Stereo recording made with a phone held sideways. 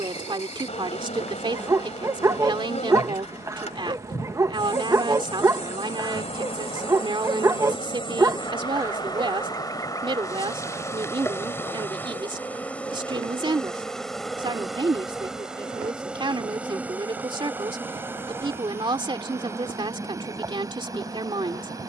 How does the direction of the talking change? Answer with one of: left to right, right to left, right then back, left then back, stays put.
stays put.